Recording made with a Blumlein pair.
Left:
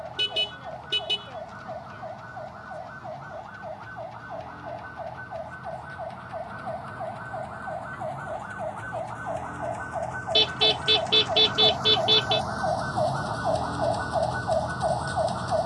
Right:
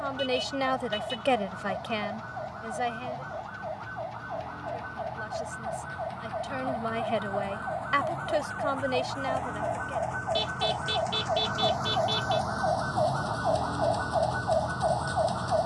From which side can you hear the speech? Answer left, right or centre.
right.